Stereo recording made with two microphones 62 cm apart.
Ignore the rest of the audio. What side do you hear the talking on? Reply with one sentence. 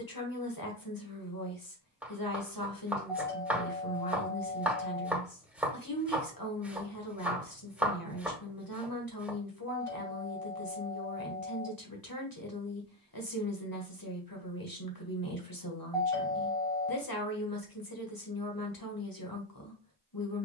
In this clip you hear the talking on the left.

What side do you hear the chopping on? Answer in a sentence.
In this clip you hear the chopping in the centre.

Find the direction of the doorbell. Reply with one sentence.
In this clip you hear the doorbell in the centre.